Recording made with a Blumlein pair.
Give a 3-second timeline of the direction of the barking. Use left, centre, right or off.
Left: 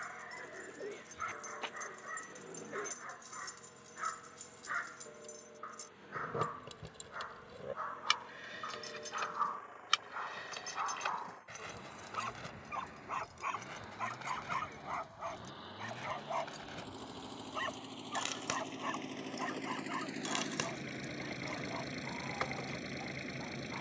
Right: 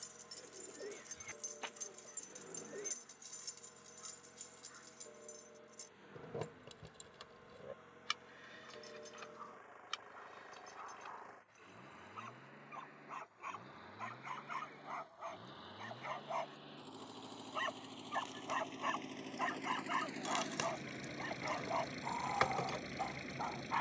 left, left, left, left, left, centre, centre, right.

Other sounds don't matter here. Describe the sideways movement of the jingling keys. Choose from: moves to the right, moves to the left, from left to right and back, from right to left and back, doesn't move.
from right to left and back.